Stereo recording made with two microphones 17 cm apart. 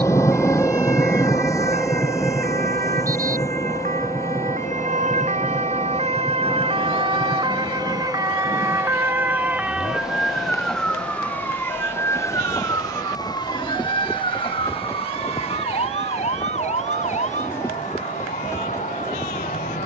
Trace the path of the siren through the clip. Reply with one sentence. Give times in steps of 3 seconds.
You can hear the siren on the right from 0 s, in the centre from 9 s and on the left from 12 s.